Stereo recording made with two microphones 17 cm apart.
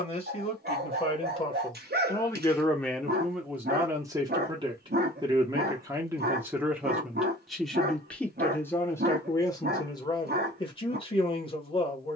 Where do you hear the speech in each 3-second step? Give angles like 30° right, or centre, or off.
30° left, 20° right, centre, 30° left.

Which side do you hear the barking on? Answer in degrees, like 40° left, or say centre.
70° right.